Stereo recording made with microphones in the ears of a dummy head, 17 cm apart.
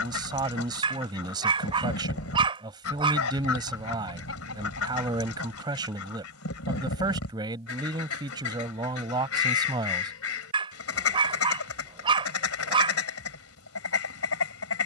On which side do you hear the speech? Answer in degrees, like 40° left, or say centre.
20° right.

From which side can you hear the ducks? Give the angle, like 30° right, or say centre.
80° left.